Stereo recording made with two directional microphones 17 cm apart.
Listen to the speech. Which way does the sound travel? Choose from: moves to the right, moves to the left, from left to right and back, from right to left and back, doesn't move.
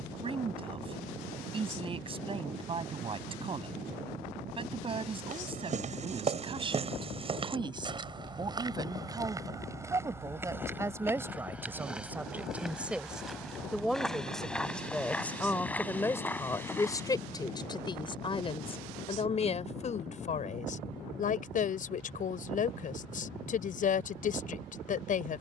moves to the left.